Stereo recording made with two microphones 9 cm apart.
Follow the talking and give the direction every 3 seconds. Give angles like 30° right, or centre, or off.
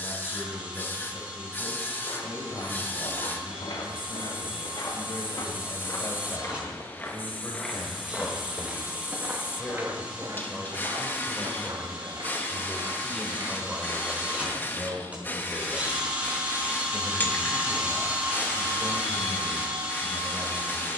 50° left, 50° left, 30° left, 10° left, 10° right, 30° right, 40° right.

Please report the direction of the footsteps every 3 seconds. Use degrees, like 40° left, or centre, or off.
70° left, 60° left, 10° left, 40° right, 50° right, off, off.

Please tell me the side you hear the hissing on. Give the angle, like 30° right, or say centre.
20° left.